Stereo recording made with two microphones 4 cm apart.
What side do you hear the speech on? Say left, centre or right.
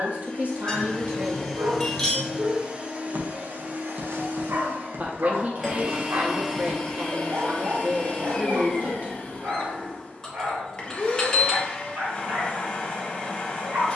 right.